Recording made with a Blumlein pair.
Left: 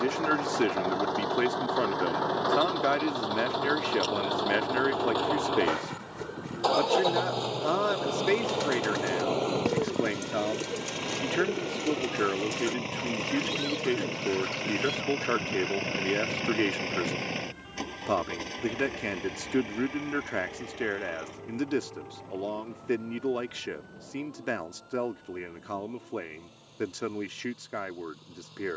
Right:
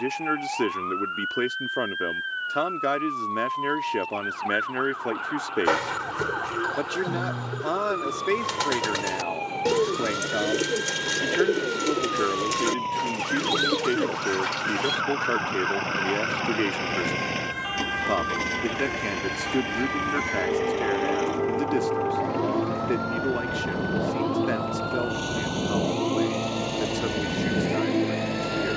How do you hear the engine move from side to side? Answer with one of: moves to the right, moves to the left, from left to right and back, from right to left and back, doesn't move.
moves to the right.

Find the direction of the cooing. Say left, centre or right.
right.